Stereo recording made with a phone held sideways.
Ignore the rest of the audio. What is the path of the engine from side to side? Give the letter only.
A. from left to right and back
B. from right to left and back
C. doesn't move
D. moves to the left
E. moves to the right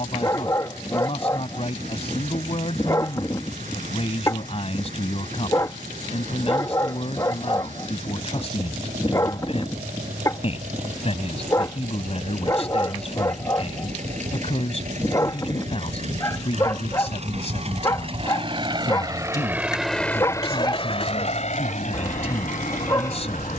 D.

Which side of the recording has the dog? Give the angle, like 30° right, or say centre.
30° left.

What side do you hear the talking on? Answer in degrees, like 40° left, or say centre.
50° left.